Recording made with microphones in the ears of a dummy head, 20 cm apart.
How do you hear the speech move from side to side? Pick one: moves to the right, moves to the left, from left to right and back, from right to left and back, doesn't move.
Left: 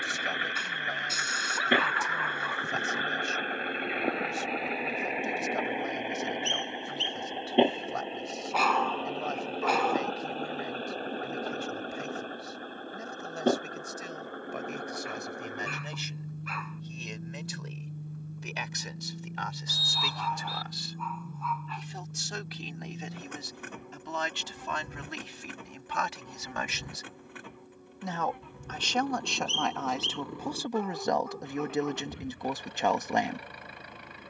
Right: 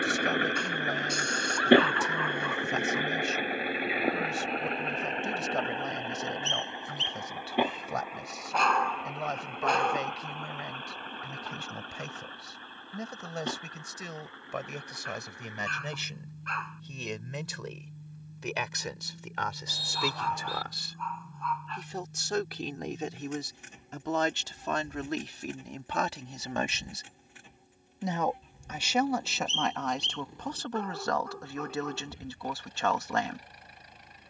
moves to the left.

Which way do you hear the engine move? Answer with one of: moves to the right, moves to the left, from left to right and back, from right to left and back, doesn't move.
moves to the left.